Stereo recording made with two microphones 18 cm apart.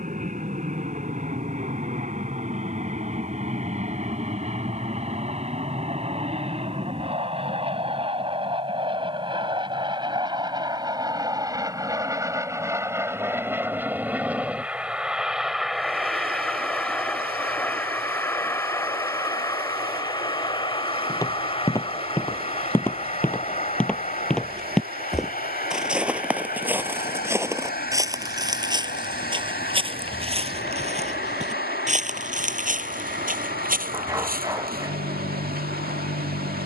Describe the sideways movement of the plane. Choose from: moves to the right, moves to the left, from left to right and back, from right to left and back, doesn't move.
moves to the left.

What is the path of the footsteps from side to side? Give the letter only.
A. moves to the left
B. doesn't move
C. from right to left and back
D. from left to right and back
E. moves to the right
E.